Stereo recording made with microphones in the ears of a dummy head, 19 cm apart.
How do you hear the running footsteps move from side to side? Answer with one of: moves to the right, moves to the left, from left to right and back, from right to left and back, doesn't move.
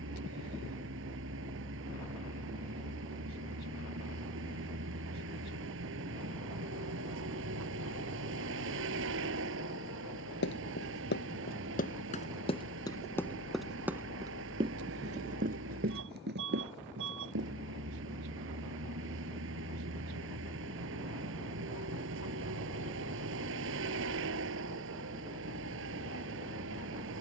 moves to the right.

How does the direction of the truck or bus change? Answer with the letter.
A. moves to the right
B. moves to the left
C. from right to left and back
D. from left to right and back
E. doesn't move
E.